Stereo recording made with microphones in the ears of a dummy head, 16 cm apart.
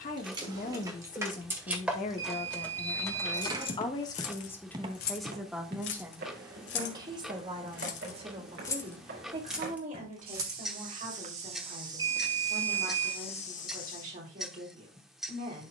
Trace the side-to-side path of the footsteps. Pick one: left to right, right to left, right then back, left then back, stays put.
right then back.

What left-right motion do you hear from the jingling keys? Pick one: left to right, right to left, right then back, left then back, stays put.
left then back.